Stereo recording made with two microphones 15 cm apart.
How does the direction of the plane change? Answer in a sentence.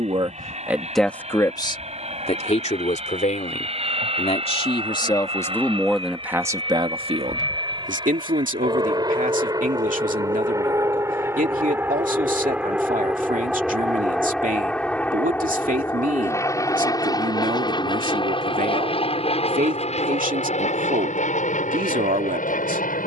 You can hear the plane move to the left.